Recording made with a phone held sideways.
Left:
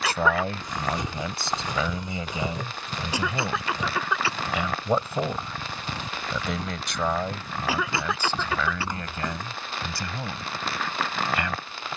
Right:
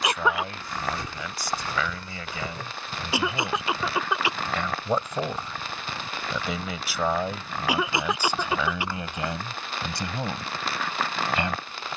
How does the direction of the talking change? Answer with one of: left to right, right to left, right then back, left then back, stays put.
left to right.